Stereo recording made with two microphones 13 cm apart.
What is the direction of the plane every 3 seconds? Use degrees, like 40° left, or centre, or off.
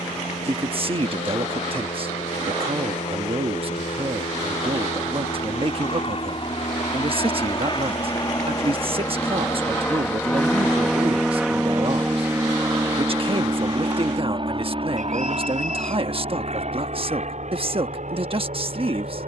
60° left, 60° left, 40° left, 10° left, 30° right, 50° right, 60° right.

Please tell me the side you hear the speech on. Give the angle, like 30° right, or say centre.
40° right.